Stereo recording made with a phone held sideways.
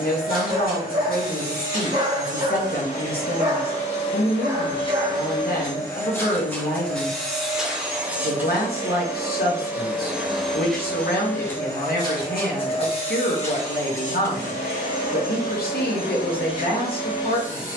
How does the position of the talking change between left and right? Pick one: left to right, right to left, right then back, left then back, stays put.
stays put.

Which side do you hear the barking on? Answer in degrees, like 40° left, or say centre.
30° right.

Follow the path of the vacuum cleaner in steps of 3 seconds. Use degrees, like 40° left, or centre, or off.
60° left, 30° left, centre, centre, 40° left, 60° left.